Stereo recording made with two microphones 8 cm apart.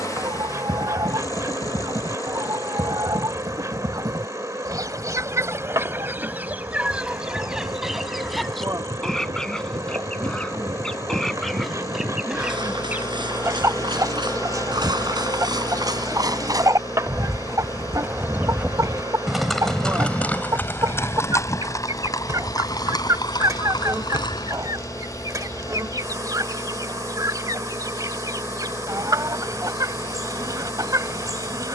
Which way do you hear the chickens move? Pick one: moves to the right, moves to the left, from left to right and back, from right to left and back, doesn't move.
from right to left and back.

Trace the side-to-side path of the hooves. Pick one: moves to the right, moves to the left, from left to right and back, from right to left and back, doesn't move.
moves to the left.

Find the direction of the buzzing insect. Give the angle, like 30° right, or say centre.
40° right.